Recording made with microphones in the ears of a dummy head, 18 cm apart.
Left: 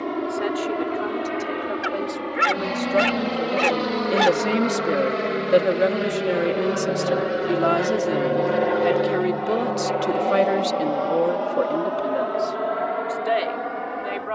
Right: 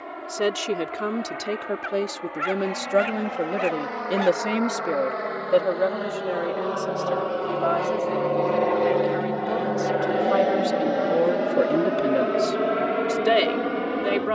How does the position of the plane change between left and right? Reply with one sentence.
You can hear the plane travel towards the right.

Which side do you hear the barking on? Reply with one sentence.
In this clip you hear the barking on the left.